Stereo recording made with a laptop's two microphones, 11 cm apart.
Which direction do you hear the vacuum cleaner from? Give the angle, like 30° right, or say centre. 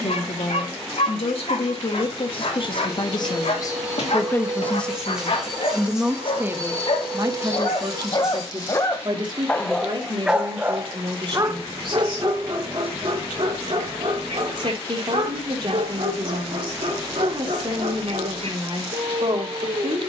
10° right.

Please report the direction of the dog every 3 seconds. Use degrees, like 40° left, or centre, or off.
80° left, 70° left, 40° left, 20° right, 60° right, 70° right, 80° right.